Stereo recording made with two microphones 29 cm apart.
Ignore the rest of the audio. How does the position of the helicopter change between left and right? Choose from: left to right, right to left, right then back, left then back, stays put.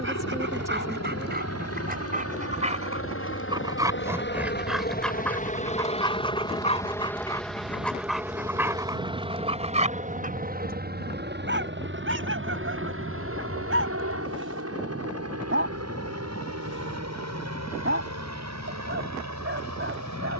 left to right.